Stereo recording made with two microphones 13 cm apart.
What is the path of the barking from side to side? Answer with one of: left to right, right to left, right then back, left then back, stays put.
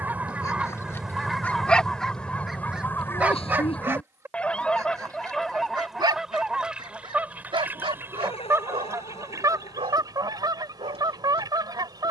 left to right.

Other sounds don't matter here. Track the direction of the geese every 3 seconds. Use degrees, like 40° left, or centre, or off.
centre, 10° left, 10° right, 30° right.